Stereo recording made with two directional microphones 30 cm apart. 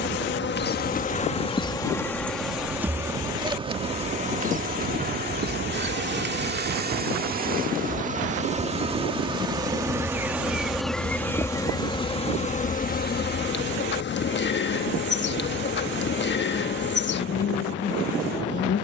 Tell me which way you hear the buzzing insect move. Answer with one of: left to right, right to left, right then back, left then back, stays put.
right then back.